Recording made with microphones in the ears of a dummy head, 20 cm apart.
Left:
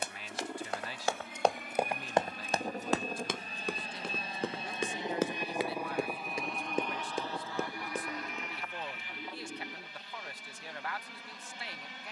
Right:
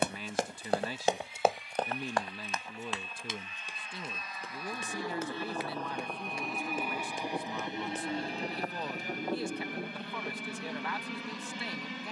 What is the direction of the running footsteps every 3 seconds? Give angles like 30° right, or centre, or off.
10° right, 50° left, 60° left, off.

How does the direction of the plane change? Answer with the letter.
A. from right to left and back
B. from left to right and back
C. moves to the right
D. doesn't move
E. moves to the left
C.